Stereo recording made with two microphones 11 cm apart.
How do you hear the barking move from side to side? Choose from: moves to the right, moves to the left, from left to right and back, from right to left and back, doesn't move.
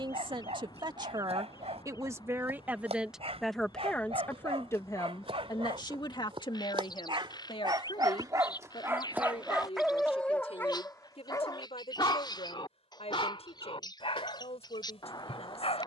moves to the left.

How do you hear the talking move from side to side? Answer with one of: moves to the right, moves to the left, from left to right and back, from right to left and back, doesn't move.
moves to the left.